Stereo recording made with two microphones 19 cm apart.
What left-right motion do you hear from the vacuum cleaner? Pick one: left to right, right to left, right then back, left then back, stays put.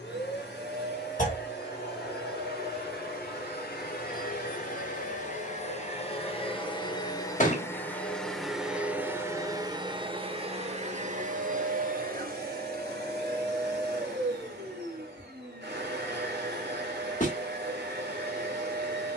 left to right.